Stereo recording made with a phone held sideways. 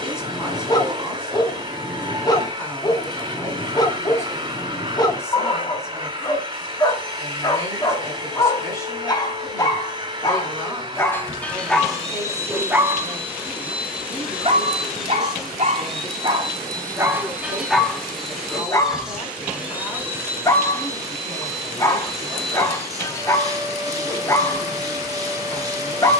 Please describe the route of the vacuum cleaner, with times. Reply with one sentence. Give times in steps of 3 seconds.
You can hear the vacuum cleaner on the right from 0 s, in the centre from 12 s and on the right from 21 s.